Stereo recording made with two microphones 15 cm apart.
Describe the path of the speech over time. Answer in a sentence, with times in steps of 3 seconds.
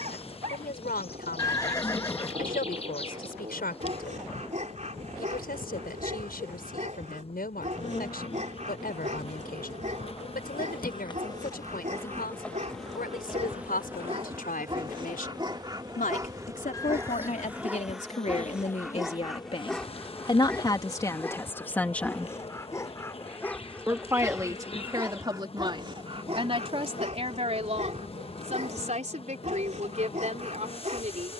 In this clip you hear the speech on the left from 0 s, in the centre from 21 s and on the right from 24 s.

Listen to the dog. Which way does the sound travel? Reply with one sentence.
You can hear the dog move from right to left and back again.